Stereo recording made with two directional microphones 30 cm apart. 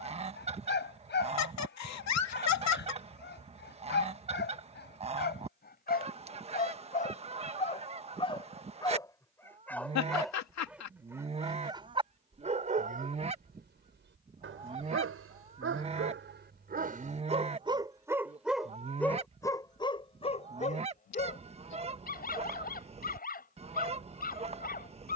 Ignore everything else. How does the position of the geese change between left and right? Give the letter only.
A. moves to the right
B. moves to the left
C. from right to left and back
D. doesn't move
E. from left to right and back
D.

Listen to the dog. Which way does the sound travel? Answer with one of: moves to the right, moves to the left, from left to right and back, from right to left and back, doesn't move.
from left to right and back.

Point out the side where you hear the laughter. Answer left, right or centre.
left.